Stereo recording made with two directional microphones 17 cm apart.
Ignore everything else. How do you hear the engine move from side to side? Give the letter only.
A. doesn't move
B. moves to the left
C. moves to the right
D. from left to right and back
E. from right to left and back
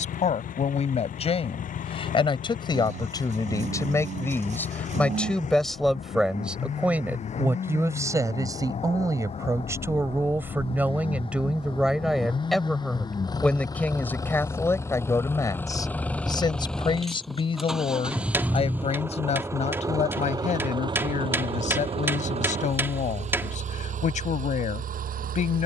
C.